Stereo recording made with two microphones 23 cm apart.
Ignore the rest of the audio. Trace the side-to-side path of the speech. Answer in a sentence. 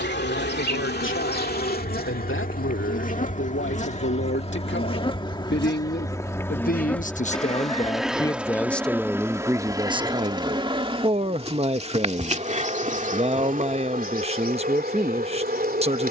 In this clip you hear the speech travel towards the right.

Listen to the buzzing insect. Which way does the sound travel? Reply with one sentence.
In this clip you hear the buzzing insect move from left to right.